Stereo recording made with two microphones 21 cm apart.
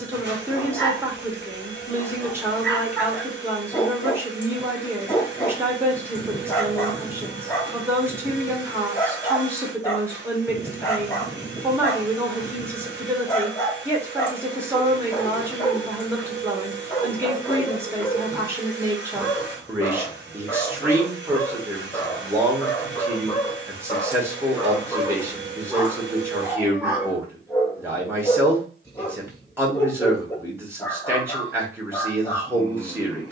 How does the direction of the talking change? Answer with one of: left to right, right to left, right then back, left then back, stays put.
stays put.